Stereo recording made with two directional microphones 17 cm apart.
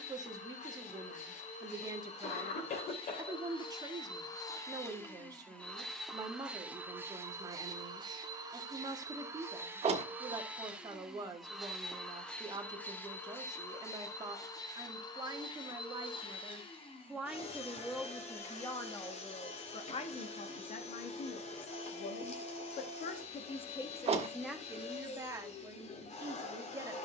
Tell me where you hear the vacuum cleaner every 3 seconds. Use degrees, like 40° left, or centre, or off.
40° left, 20° left, 20° right, 10° right, 10° left, 30° left, 40° left, 40° left, 40° left.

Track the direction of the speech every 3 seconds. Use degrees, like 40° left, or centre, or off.
20° right, 20° right, 20° right, 20° right, 20° right, 10° right, 30° left, 50° left, 10° right.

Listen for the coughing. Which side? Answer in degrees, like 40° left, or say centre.
50° left.